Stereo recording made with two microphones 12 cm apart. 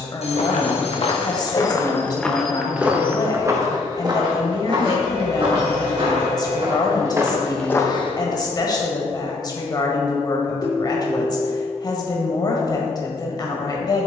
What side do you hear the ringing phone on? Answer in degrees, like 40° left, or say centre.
60° left.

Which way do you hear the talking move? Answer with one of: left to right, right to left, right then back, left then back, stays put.
stays put.